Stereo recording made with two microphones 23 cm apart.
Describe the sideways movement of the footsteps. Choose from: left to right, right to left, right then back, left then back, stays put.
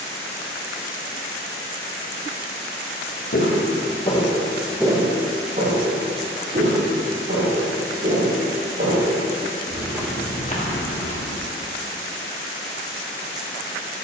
right then back.